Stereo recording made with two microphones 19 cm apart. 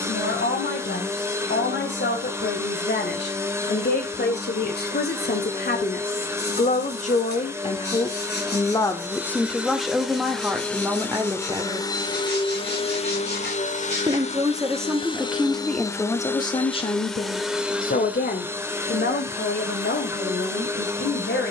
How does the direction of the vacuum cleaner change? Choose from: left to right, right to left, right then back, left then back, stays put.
left then back.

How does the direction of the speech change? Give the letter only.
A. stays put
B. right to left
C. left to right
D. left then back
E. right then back
E.